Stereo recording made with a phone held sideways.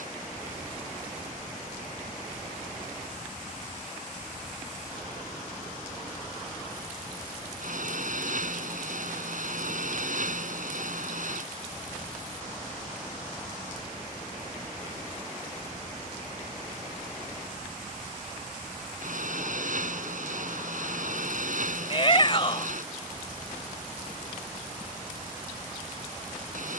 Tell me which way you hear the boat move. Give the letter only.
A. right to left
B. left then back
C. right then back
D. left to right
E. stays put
E.